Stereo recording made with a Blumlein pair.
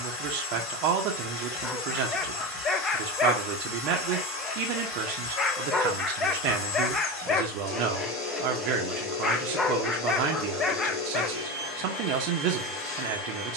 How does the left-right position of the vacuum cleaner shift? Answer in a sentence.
In this clip you hear the vacuum cleaner stay put.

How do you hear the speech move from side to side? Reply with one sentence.
In this clip you hear the speech stay put.